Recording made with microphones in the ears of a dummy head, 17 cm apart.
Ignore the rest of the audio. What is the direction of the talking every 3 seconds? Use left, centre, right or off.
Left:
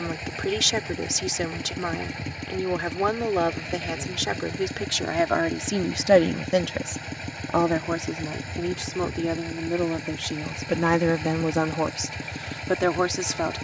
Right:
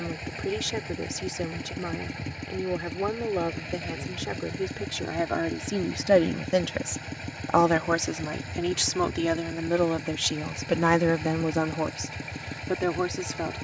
left, left, right, right, left.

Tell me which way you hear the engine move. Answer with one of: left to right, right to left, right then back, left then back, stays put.
stays put.